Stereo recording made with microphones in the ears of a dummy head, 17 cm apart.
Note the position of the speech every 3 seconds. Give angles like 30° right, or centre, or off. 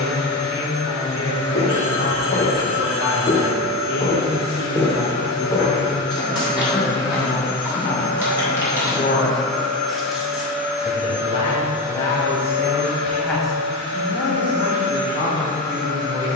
60° left, 60° left, 50° left, 30° left, centre, 20° right.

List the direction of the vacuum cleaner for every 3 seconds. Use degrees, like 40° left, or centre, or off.
20° left, 20° left, 10° left, 10° right, 30° right, 40° right.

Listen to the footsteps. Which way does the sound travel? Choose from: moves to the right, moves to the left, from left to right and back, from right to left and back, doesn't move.
moves to the right.